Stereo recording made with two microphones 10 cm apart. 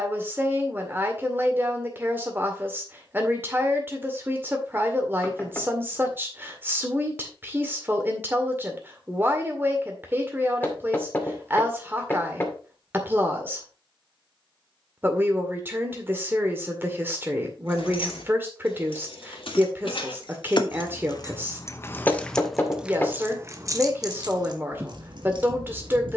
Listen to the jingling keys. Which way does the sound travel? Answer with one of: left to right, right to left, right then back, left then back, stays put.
left to right.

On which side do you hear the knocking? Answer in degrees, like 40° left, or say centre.
20° left.